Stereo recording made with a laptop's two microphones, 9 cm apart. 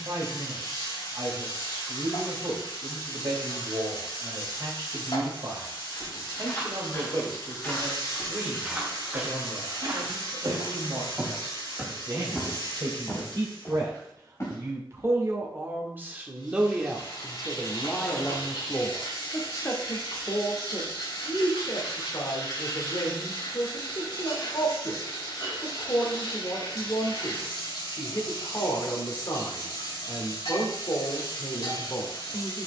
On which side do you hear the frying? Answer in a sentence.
In this clip you hear the frying on the left.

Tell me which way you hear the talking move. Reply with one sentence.
In this clip you hear the talking move to the left.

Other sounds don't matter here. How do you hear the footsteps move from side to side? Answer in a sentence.
You can hear the footsteps move from left to right and back again.